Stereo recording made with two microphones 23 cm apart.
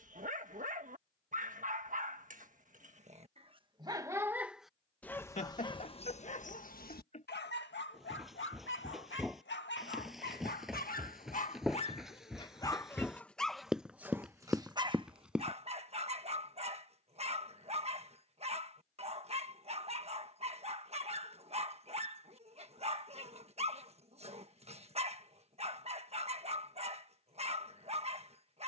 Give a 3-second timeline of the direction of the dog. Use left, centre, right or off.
right, centre, left, left, centre, right, right, right, right, right.